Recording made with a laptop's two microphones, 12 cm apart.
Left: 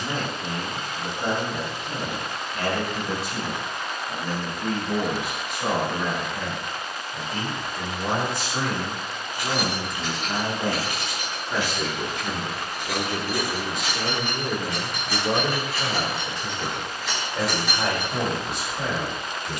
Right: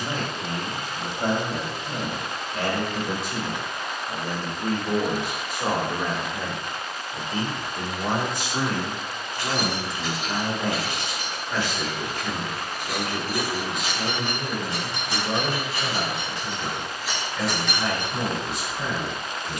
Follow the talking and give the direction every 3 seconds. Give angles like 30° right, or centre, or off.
60° right, 50° right, 30° right, centre, 30° left, 50° left, 60° left.